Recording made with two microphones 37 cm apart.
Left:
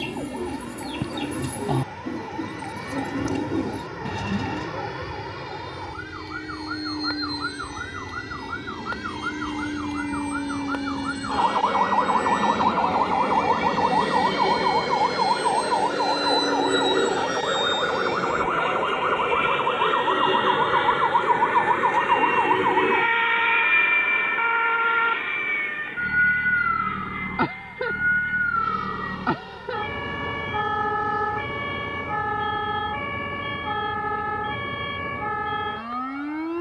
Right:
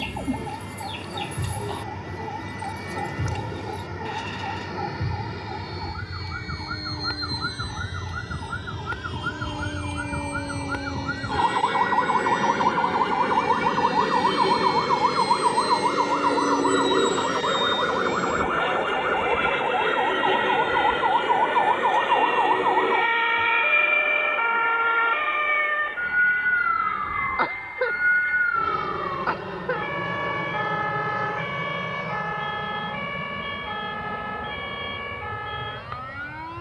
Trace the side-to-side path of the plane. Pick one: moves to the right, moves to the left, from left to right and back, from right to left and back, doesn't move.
moves to the right.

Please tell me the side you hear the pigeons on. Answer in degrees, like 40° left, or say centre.
60° left.